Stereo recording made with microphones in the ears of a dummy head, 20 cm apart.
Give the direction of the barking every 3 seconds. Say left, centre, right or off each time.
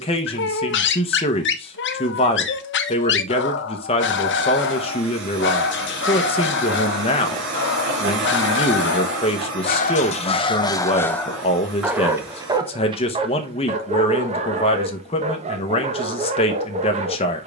left, left, left, left, right, right.